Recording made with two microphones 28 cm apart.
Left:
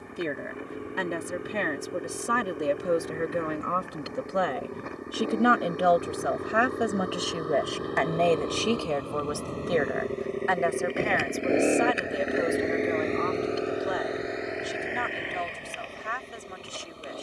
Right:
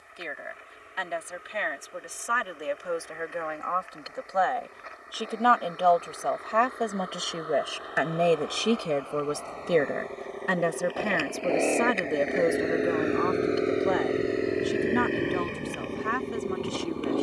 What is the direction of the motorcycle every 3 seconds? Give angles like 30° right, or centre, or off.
60° left, 60° left, 50° left, 30° left, 20° right, 60° right.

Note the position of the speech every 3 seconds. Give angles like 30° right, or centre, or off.
50° left, 30° left, centre, 40° right, 60° right, 70° right.